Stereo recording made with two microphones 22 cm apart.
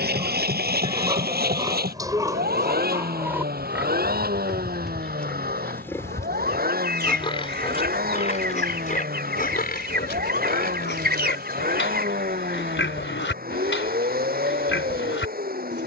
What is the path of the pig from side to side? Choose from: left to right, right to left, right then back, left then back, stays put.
right to left.